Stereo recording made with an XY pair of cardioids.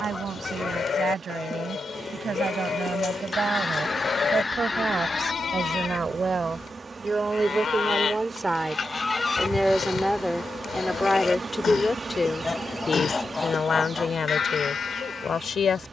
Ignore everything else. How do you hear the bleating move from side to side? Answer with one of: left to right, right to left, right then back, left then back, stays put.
stays put.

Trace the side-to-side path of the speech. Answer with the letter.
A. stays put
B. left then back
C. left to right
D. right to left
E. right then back
D.